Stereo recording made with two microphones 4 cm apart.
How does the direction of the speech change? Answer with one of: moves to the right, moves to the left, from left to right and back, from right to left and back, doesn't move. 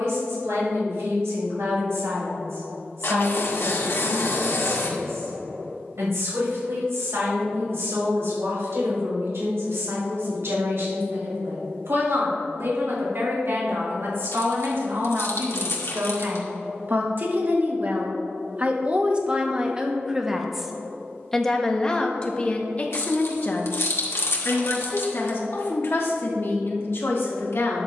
moves to the left.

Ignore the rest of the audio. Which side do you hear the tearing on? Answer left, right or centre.
left.